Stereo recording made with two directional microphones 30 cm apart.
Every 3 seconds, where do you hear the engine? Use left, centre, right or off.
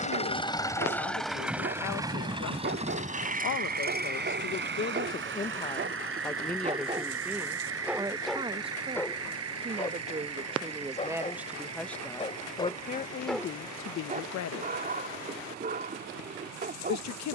centre, right, right, right, right, right.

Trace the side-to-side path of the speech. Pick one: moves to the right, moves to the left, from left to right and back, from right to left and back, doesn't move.
from left to right and back.